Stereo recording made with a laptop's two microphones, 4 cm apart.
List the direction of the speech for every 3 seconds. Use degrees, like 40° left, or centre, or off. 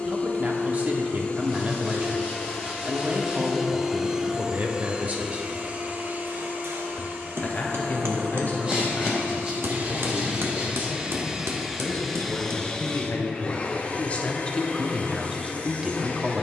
40° right, 40° right, 40° left, 60° left, 40° left, 10° right.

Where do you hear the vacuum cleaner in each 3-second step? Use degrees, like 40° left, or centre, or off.
30° left, 20° right, 50° right, 30° right, 30° left, 40° left.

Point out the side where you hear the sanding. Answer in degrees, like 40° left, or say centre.
30° right.